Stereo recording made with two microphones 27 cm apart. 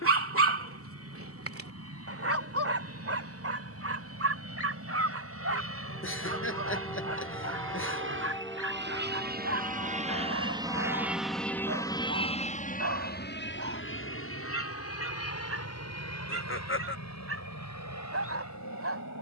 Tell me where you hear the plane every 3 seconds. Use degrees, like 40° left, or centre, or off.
80° right, 70° right, 60° right, 20° right, 40° left, 60° left, 70° left.